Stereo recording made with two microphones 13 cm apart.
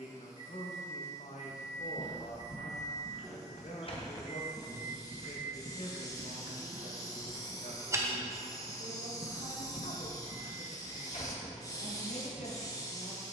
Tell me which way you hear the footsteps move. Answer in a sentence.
You can hear the footsteps move from left to right and back again.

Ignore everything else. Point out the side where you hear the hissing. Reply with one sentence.
You can hear the hissing on the left.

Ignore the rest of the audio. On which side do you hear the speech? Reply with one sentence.
In this clip you hear the speech on the left.